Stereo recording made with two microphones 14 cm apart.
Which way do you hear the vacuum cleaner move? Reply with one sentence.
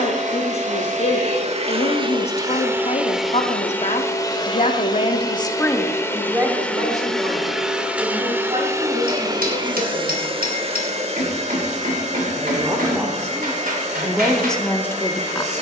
In this clip you hear the vacuum cleaner move from right to left and back again.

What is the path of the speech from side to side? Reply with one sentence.
In this clip you hear the speech move from left to right and back again.